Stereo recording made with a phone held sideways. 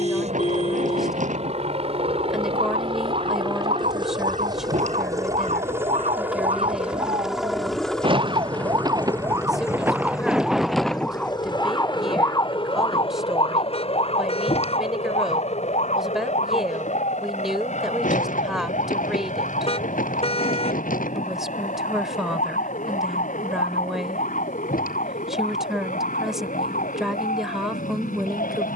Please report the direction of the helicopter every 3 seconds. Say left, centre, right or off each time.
right, right, centre, left, left, left, left, left, left, left.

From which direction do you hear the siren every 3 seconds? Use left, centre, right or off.
right, right, right, centre, left, left, left, left, left, left.